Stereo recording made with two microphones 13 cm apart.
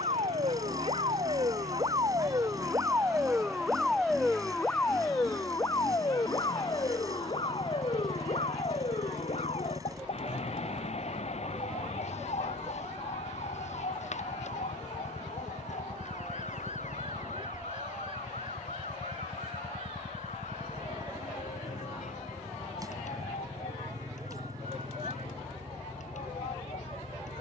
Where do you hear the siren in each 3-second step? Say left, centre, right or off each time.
right, centre, left, left, left, left, left, left, left.